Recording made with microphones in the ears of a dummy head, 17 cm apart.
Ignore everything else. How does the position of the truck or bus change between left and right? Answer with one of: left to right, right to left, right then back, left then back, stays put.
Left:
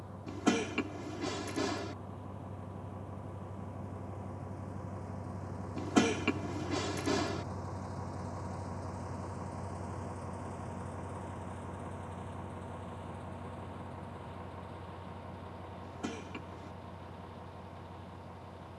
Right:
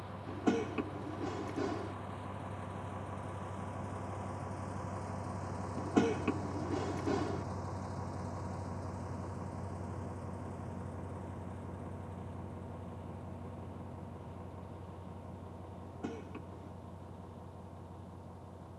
right to left.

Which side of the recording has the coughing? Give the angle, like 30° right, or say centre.
70° left.